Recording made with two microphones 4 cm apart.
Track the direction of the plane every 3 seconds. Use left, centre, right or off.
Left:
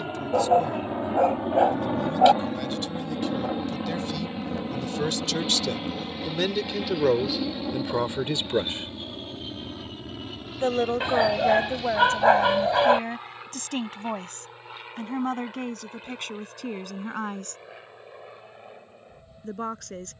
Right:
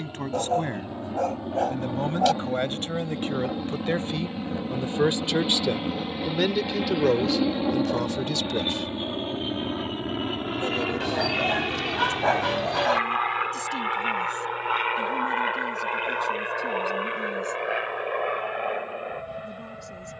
left, centre, right, right, right, right, right.